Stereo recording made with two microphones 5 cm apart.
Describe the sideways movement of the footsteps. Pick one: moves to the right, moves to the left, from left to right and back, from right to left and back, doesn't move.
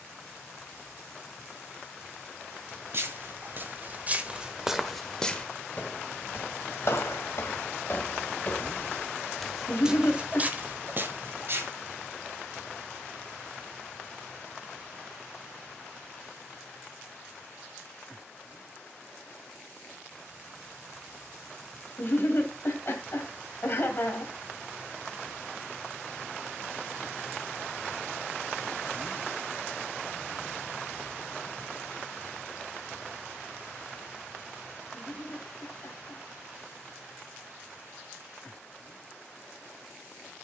from right to left and back.